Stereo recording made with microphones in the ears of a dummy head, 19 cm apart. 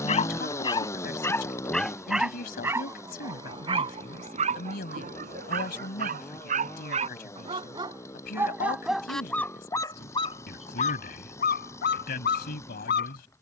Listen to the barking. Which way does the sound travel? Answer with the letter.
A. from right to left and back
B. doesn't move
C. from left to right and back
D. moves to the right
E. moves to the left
C.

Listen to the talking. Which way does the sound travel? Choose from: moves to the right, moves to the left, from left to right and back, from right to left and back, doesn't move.
doesn't move.